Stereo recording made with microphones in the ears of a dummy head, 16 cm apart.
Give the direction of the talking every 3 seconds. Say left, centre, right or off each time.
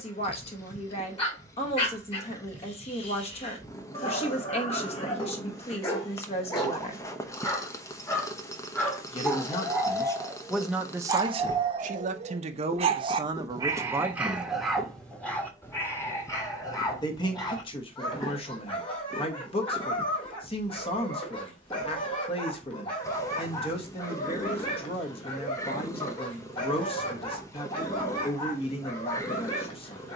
left, left, left, centre, right, left, left, left, left, left.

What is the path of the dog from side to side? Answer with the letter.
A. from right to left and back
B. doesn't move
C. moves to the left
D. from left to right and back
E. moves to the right
D.